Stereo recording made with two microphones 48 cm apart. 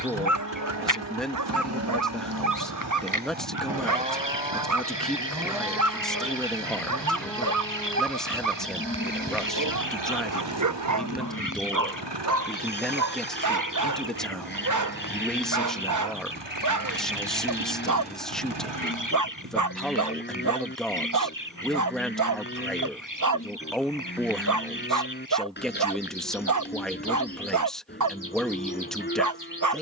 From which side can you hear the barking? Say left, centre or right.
right.